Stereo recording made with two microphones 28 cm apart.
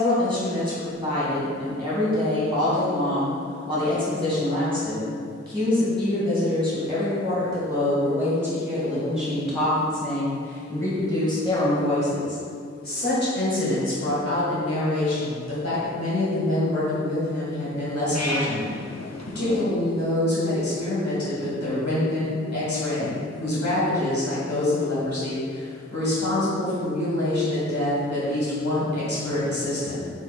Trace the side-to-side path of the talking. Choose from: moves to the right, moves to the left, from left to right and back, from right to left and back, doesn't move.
moves to the left.